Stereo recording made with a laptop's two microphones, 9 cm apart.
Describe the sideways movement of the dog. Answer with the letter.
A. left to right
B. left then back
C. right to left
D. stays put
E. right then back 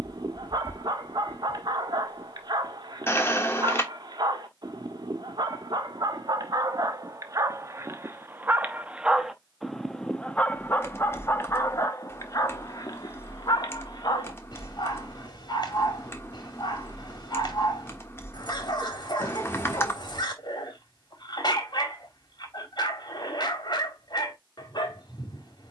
C.